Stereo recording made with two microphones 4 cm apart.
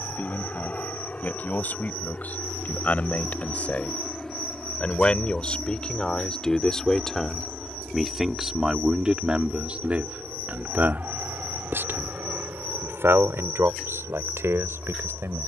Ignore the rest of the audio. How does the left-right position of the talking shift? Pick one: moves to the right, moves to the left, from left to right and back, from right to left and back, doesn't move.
moves to the right.